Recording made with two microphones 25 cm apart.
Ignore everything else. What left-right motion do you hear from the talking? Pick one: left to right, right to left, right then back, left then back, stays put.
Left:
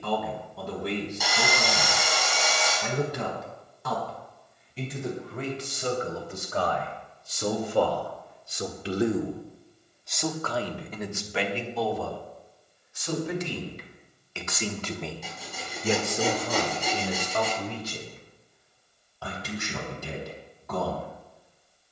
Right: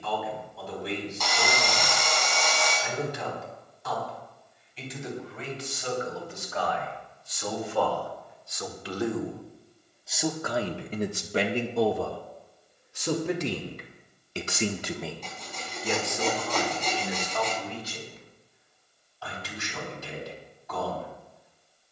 right then back.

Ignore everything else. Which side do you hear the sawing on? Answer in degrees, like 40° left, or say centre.
10° left.